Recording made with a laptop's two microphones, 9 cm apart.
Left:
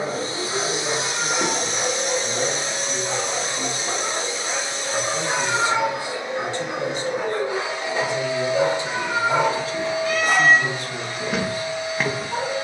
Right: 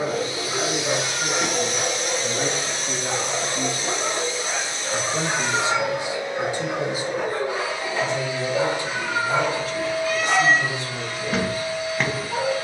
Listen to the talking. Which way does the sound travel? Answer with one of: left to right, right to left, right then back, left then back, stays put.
right to left.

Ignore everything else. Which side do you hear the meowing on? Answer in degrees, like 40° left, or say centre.
50° left.